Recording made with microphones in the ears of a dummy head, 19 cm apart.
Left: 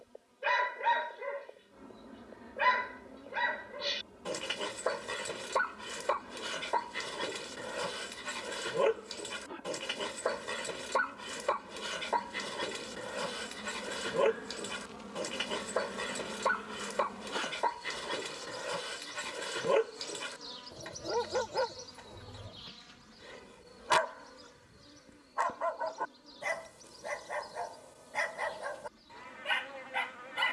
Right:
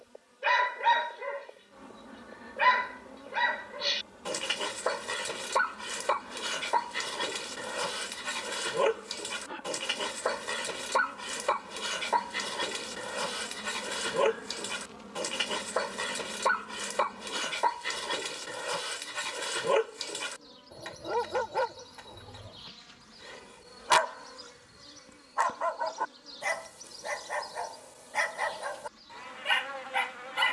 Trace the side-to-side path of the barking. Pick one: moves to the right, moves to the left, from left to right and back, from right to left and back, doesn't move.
doesn't move.